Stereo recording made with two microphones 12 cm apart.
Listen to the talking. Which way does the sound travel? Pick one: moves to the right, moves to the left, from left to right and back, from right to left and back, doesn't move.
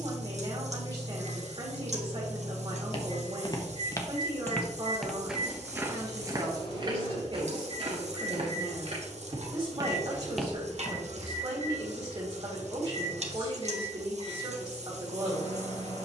doesn't move.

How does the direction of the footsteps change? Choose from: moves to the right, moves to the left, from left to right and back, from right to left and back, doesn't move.
from left to right and back.